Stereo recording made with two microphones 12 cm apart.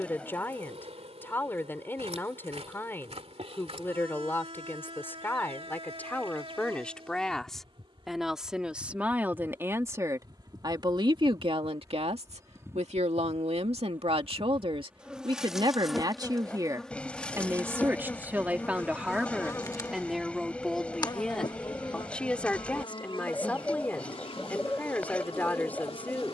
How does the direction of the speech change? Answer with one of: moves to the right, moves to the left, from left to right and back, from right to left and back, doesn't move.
from left to right and back.